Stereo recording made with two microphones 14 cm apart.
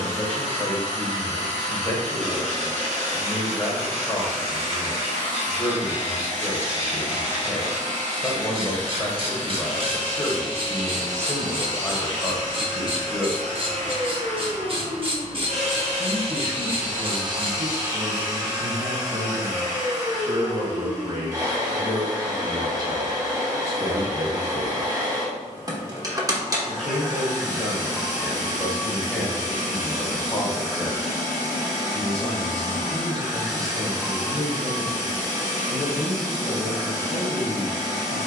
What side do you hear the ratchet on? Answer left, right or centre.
right.